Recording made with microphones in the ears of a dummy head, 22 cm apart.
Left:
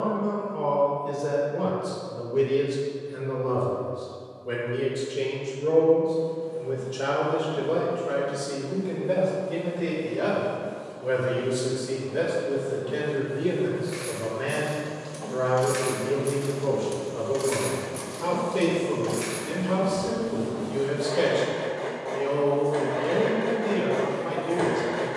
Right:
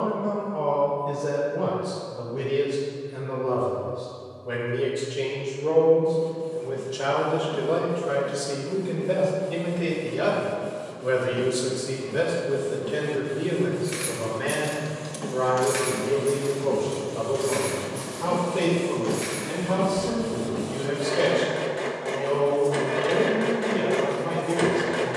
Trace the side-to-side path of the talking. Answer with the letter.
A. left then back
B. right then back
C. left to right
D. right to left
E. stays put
B.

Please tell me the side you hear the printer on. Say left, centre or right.
right.